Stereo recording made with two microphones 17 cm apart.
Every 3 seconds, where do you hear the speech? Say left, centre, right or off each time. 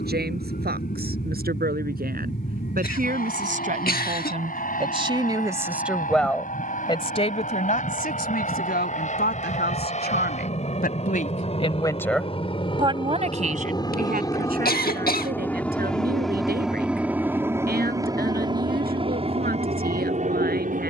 right, right, left, left, right, right, right.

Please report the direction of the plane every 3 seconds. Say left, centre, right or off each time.
left, left, left, left, left, centre, right.